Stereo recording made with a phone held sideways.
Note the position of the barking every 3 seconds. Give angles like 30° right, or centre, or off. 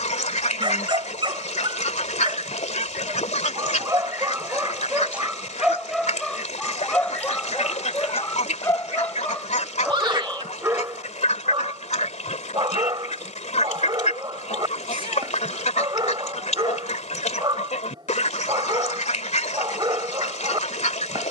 40° right, 20° right, 10° left, 10° right, 40° right, 40° right, 40° right.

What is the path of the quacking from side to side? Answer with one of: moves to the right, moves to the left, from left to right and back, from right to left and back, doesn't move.
doesn't move.